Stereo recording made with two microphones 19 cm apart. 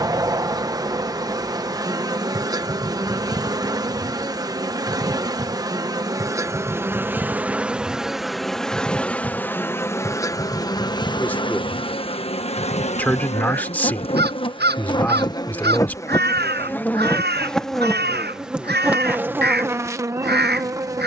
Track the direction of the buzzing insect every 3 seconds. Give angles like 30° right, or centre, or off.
20° right, 20° right, 10° right, 20° left, 30° left, 10° left, 10° right.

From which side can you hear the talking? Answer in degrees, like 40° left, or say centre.
10° left.